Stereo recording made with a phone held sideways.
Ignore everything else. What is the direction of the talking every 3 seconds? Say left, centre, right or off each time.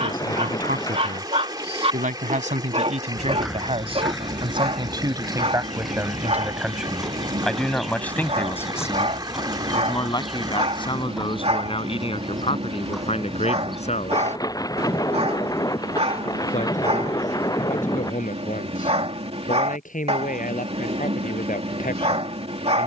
right, right, centre, left, left, left, left, left.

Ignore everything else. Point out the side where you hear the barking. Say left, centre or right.
right.